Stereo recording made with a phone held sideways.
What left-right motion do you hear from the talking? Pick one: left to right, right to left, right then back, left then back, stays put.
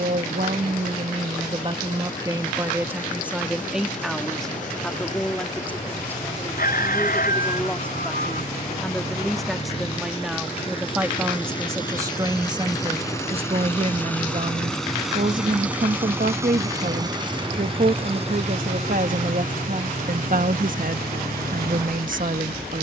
left then back.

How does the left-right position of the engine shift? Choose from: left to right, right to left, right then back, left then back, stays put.
left to right.